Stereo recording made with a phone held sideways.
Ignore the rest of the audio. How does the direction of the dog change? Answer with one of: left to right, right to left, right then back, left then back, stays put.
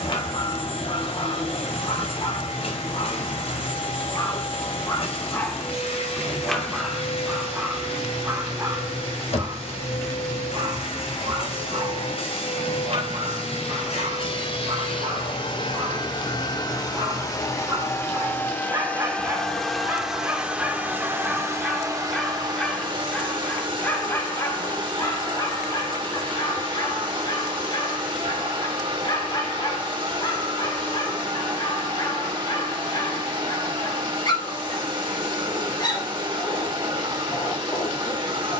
right then back.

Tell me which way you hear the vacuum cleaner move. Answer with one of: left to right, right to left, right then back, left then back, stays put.
left to right.